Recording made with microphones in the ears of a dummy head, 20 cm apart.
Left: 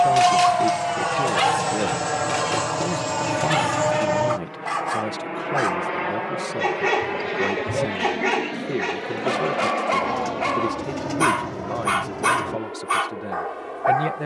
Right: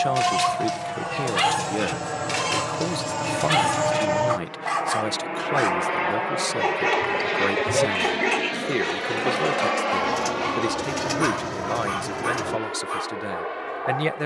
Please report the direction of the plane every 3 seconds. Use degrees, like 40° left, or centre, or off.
30° left, 10° right, 40° right, 50° right, 60° right.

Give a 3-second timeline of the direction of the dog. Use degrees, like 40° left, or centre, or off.
10° right, 20° right, centre, 20° left, 40° left.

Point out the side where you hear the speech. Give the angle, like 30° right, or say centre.
50° right.